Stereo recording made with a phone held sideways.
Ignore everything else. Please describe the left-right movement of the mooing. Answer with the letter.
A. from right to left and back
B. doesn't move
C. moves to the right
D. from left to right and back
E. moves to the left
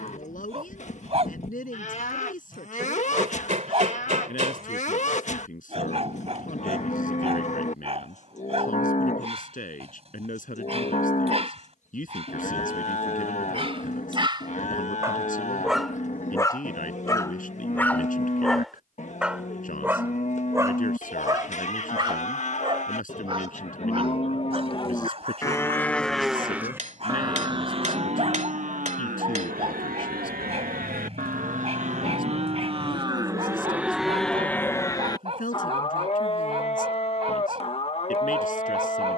D.